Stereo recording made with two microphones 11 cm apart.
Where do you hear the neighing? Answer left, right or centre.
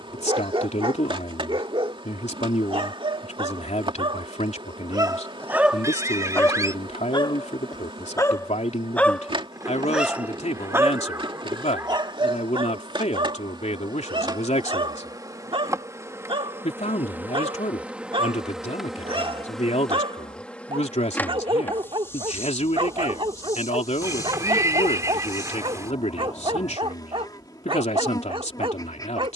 right.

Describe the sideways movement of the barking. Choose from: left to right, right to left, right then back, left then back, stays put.
left then back.